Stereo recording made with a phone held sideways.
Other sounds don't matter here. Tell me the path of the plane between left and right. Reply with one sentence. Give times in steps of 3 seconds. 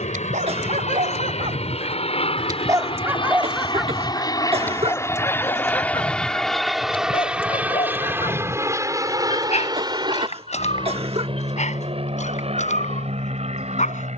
You can hear the plane on the left from 0 s, in the centre from 6 s and on the right from 9 s.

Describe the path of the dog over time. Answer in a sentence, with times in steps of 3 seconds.
You can hear the dog on the right from 0 s, in the centre from 3 s and on the left from 6 s.